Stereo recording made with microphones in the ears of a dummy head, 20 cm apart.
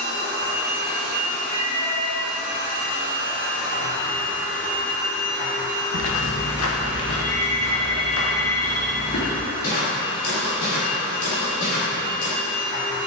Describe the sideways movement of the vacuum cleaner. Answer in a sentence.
In this clip you hear the vacuum cleaner stay in one place.